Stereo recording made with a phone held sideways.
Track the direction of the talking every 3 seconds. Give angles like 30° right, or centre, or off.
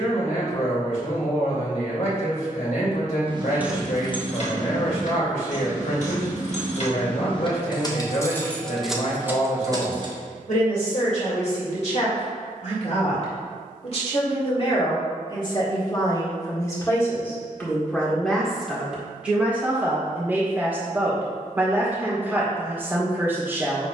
60° left, 60° left, 60° left, 60° left, 50° left, 20° left, 10° right, 10° right.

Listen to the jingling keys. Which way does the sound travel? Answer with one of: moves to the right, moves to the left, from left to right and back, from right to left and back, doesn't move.
from right to left and back.